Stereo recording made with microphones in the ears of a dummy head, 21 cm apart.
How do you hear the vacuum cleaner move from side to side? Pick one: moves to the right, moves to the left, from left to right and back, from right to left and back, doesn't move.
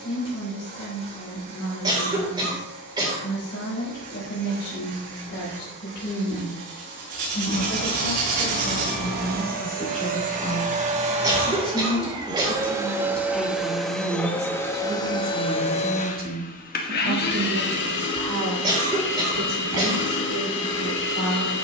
moves to the left.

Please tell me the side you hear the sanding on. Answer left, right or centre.
right.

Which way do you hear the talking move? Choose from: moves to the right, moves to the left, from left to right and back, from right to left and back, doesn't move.
moves to the right.